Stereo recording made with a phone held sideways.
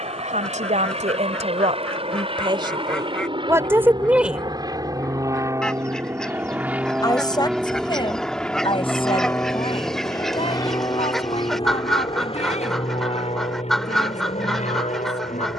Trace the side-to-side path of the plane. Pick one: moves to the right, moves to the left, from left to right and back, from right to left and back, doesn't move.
moves to the left.